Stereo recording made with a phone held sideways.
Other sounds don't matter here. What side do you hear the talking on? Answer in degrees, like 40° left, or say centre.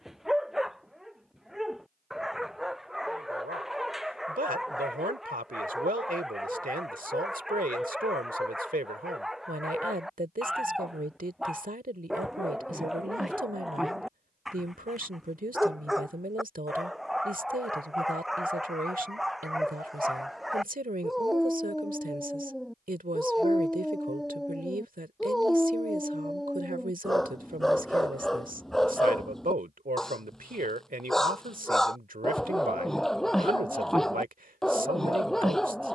60° right.